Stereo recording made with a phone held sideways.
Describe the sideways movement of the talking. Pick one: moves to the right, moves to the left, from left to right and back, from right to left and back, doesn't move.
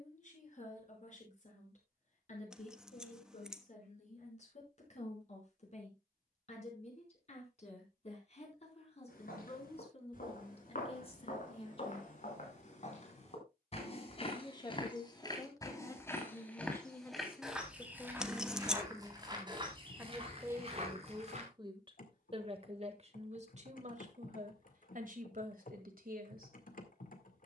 moves to the right.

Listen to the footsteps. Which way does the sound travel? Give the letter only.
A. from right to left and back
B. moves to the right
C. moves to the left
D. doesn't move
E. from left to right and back
B.